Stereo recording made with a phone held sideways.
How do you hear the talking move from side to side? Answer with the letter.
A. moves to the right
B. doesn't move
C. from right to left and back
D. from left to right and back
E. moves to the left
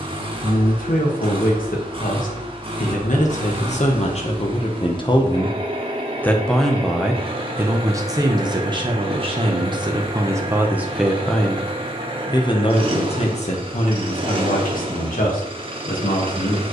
D.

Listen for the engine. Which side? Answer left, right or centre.
right.